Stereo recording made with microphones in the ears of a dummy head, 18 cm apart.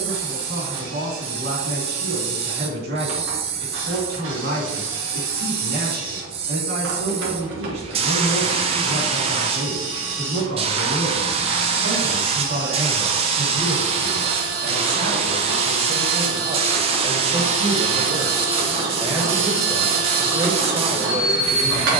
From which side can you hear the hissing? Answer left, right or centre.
right.